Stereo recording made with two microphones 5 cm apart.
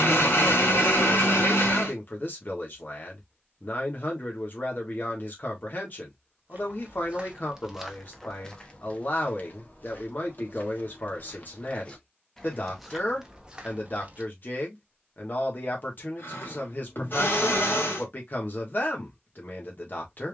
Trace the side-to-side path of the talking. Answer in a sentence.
You can hear the talking stay in one place.